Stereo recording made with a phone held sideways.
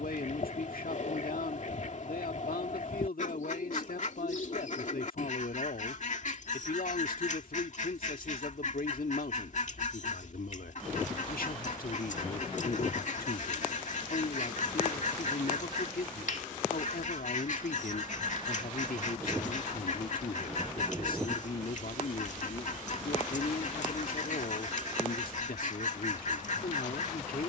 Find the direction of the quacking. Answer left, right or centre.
left.